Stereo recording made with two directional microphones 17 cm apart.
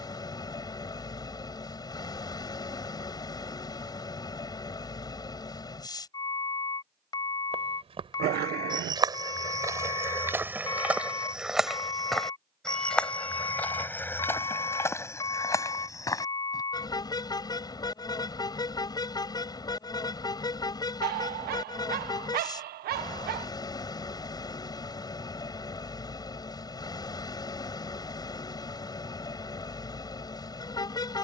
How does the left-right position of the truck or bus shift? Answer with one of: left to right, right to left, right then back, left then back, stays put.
stays put.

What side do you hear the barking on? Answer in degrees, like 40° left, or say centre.
60° right.